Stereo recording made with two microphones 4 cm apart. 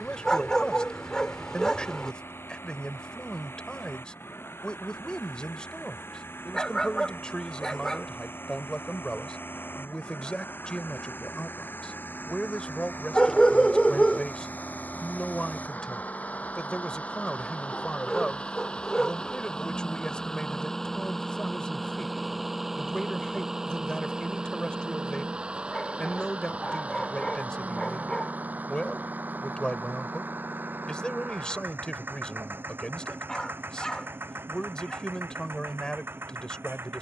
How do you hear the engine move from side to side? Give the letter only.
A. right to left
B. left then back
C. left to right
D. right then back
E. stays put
C.